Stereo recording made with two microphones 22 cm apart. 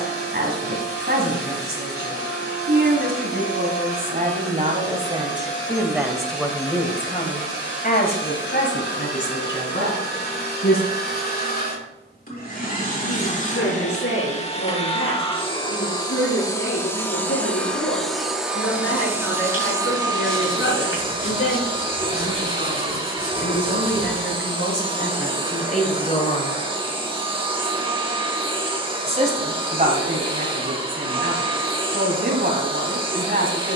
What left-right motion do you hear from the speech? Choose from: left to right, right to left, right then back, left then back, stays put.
left then back.